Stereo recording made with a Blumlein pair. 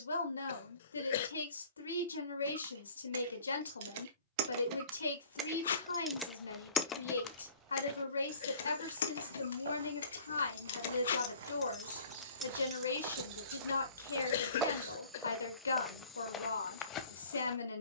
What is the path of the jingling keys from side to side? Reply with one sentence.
In this clip you hear the jingling keys go left and come back.